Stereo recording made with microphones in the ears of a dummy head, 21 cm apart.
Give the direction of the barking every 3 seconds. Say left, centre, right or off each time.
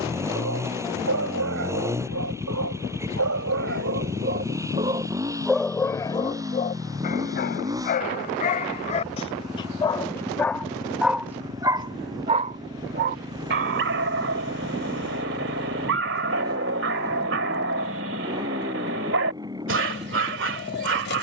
right, right, left, centre, right, right, right.